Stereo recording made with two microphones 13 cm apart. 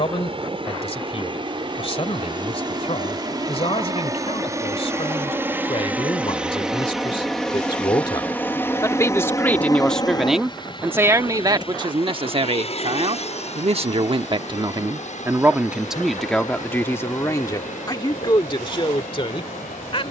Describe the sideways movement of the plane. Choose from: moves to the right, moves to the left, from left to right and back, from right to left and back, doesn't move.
moves to the left.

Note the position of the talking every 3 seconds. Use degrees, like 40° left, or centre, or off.
50° left, 50° left, 40° left, 10° right, 50° right, 10° left, 40° left.